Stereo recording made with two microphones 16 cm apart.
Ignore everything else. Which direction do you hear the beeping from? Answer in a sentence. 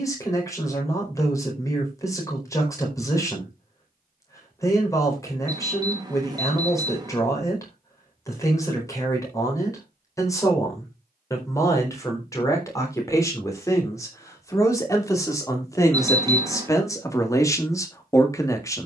In this clip you hear the beeping on the right.